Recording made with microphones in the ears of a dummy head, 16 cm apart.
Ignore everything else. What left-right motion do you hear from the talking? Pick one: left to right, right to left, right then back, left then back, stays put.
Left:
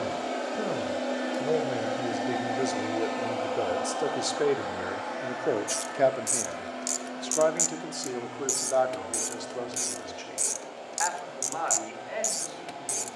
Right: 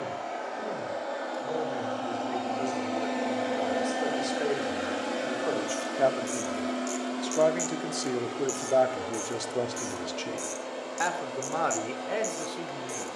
left to right.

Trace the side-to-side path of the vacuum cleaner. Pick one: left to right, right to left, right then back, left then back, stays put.
left to right.